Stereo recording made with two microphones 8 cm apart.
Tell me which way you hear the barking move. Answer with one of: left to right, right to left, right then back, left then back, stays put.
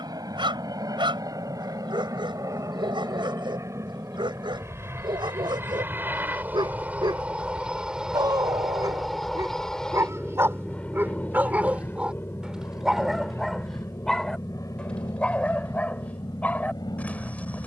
right to left.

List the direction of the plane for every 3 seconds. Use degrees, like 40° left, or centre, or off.
50° right, 40° right, 10° right, 10° left, 30° left, 50° left.